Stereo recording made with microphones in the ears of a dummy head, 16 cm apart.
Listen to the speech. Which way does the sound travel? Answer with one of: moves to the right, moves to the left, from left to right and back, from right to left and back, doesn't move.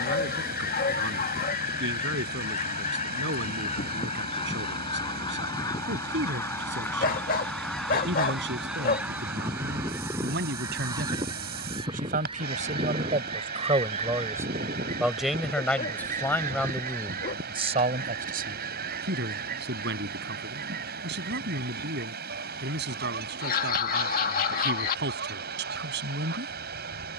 from right to left and back.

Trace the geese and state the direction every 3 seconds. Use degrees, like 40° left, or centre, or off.
50° left, 30° left, 10° left, 20° right, 40° right, 50° right, 50° right, 60° right, 60° right.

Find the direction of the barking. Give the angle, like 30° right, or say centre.
50° left.